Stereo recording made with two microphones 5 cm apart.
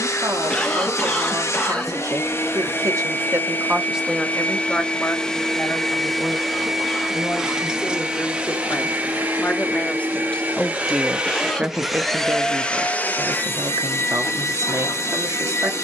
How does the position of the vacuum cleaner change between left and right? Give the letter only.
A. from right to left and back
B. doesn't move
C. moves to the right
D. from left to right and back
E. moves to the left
D.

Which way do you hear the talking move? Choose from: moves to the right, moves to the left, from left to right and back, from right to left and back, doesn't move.
from right to left and back.